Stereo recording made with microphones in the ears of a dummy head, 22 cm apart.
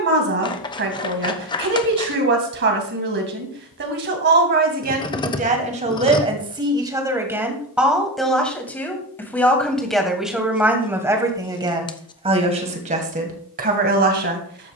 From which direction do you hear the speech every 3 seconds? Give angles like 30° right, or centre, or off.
50° right, 40° right, 10° right, 10° right, 30° right.